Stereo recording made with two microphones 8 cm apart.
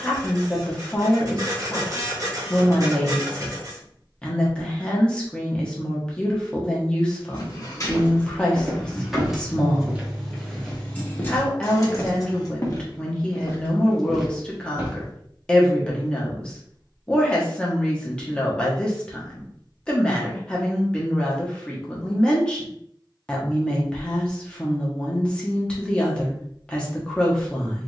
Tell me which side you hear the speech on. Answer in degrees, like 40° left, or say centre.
10° left.